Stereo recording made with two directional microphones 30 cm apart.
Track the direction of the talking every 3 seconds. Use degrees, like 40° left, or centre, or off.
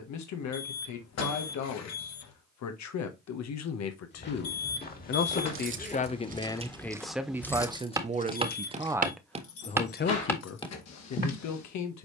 70° left, 50° left, 10° right, 40° left.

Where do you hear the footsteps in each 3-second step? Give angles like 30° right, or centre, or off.
off, 30° left, centre, centre.